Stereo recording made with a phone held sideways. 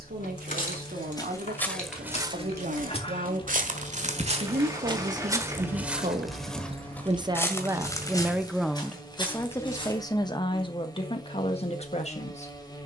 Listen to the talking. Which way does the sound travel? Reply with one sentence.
In this clip you hear the talking travel towards the left.